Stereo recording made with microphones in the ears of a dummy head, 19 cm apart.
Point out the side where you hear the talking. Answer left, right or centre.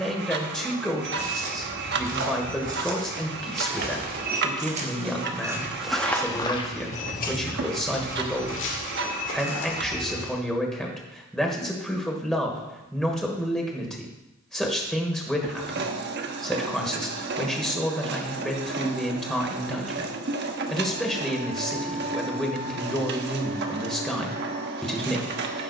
centre.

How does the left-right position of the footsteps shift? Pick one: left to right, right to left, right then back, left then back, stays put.
right to left.